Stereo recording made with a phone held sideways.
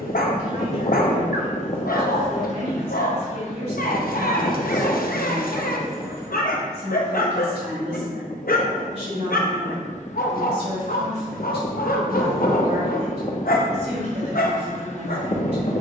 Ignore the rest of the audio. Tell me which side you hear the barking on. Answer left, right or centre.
left.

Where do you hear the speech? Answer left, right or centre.
right.